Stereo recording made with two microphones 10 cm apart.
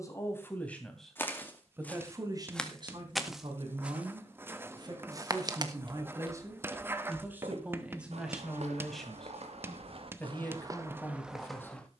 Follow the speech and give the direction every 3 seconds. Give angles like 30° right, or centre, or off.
10° right, 40° right, 10° right, 20° left.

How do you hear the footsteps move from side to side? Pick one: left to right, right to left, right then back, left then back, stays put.
right then back.